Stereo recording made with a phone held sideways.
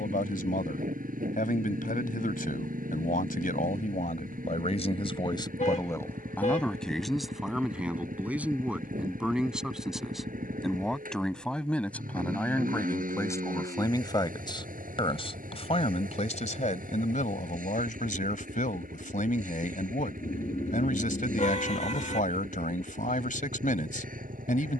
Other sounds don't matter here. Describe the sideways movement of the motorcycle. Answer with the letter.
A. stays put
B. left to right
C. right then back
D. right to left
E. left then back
A.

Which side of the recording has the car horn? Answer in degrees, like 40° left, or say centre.
50° left.